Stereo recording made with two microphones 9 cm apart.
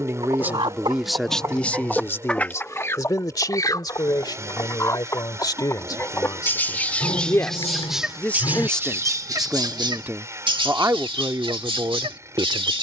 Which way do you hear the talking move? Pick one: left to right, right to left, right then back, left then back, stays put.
left then back.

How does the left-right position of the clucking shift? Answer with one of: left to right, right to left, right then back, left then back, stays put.
left then back.